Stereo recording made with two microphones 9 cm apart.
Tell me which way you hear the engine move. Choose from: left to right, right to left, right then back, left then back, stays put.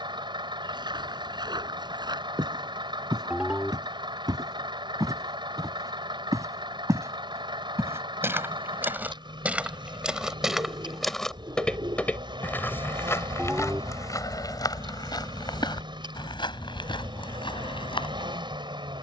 stays put.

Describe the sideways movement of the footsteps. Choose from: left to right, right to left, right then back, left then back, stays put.
right to left.